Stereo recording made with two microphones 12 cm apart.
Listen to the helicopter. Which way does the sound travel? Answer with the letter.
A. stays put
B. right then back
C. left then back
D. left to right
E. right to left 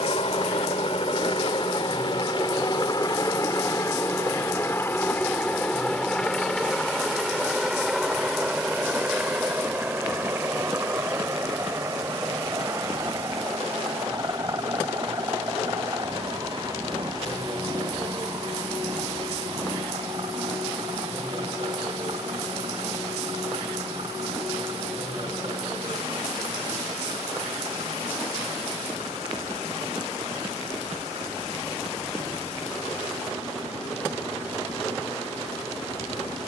D.